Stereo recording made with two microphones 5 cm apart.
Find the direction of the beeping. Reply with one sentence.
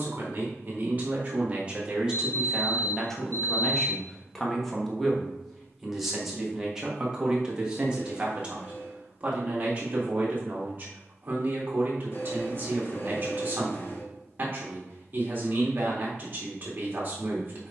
You can hear the beeping on the left.